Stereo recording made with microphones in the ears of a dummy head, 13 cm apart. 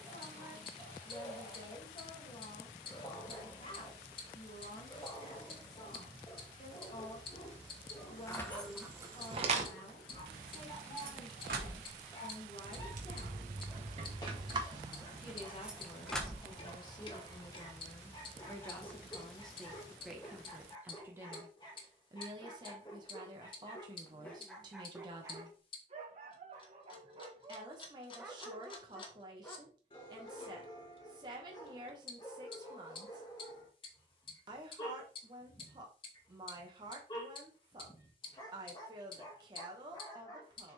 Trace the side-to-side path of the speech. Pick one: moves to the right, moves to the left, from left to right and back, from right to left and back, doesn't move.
moves to the right.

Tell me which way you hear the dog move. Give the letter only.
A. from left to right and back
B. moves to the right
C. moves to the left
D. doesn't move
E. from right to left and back
A.